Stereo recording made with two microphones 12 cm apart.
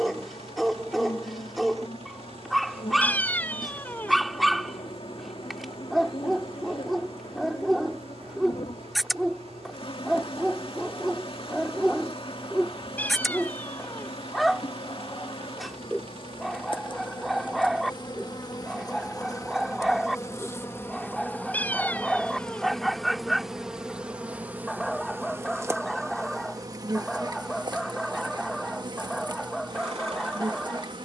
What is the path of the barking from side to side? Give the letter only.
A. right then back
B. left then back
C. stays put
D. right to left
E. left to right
C.